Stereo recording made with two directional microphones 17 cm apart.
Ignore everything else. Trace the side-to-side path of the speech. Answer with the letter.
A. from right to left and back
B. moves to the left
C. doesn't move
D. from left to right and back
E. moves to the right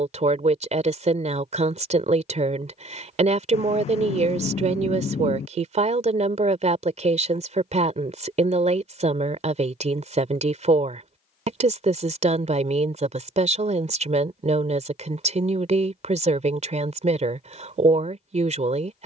C.